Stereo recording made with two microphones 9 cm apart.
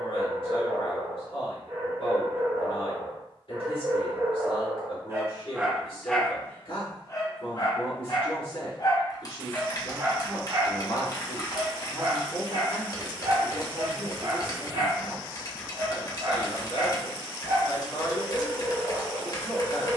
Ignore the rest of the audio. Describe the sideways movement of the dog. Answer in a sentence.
You can hear the dog move from right to left and back again.